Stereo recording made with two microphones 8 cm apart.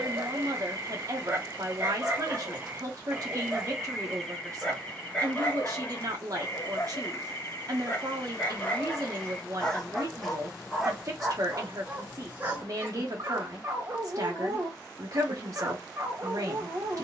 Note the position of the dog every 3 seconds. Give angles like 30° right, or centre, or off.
30° right, 10° left, 30° left, centre, 30° right, 30° right.